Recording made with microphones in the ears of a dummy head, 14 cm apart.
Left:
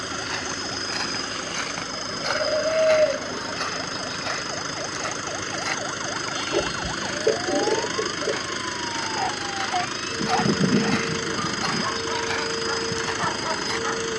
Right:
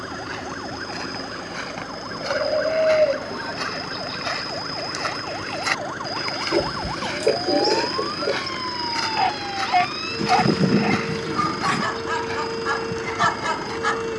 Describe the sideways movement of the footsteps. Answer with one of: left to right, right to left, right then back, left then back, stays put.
right then back.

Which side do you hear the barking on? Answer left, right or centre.
right.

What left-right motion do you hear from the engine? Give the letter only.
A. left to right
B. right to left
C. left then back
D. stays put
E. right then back
D.